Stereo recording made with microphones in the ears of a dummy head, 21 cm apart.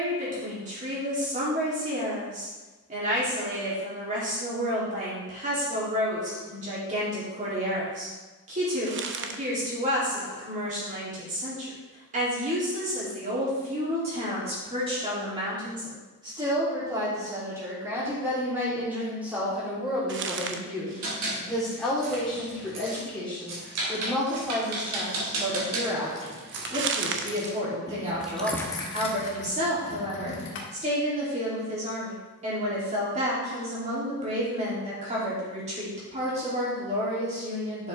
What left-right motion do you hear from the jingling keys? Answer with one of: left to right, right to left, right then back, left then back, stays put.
right to left.